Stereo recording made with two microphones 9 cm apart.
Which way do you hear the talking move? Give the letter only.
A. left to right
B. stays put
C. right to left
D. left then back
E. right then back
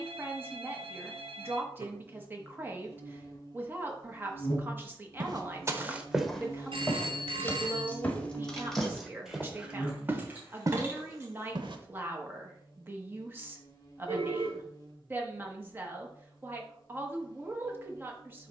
B.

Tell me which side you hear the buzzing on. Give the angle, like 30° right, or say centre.
40° left.